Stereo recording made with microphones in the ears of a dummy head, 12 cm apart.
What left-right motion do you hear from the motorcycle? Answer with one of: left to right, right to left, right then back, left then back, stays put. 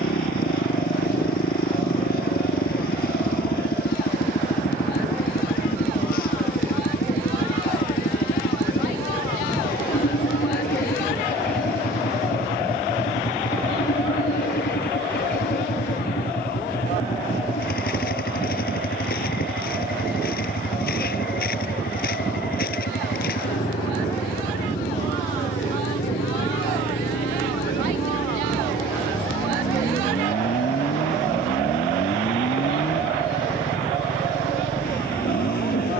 stays put.